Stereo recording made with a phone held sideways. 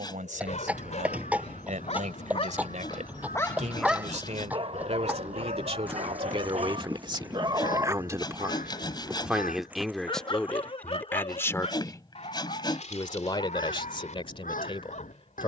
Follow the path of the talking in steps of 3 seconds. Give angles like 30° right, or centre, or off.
70° right, 50° right, 30° right, 10° left, 40° left.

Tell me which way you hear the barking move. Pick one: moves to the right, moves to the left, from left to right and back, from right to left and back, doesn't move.
from left to right and back.